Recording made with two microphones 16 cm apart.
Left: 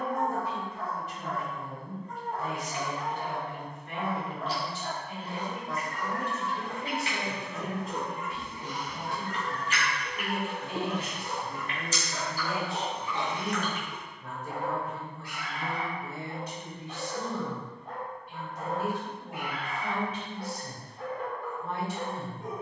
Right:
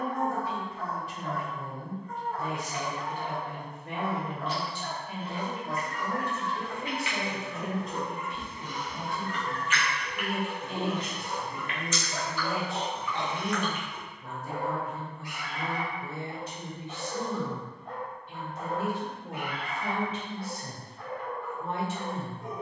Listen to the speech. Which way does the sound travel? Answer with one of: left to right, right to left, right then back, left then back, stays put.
left then back.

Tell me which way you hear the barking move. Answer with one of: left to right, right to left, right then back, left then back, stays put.
right then back.